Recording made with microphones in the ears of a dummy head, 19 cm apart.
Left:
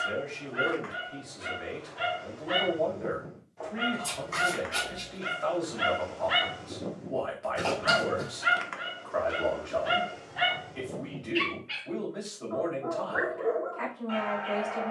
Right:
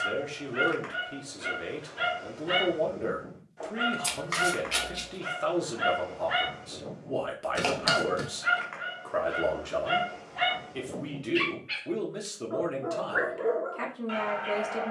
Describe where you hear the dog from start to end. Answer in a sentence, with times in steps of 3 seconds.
In this clip you hear the dog on the right from 0 s, in the centre from 3 s, on the left from 6 s, in the centre from 9 s and on the right from 12 s.